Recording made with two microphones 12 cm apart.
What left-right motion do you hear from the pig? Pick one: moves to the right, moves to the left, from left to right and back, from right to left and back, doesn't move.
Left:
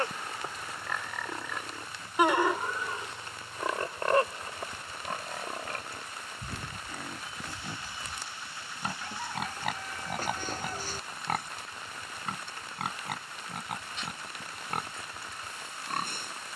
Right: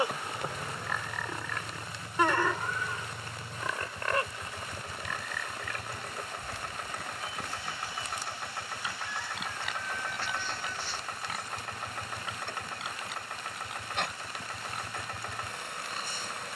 moves to the left.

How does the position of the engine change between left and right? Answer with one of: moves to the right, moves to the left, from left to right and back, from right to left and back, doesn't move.
doesn't move.